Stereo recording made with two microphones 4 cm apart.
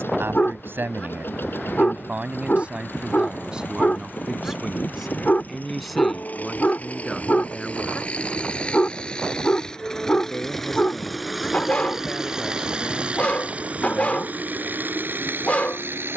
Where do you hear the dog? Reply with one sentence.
You can hear the dog on the left.